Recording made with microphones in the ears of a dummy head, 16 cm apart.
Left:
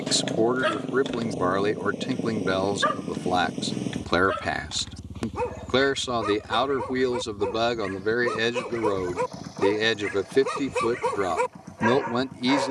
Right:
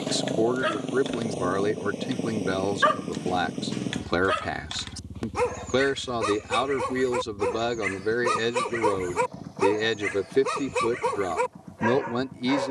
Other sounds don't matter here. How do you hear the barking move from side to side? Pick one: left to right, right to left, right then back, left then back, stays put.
right then back.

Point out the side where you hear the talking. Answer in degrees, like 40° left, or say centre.
20° left.